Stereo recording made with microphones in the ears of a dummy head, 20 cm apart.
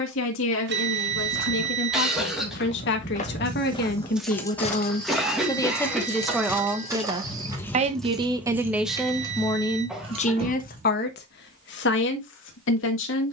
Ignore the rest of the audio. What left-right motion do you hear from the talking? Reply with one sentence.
In this clip you hear the talking go right and come back.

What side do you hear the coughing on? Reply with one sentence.
You can hear the coughing in the centre.